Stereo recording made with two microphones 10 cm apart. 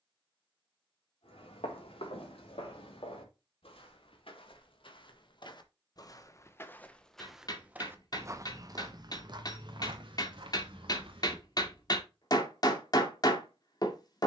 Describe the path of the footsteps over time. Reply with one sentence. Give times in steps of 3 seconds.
In this clip you hear the footsteps on the left from 0 s, in the centre from 6 s, on the right from 9 s and not at all from 12 s.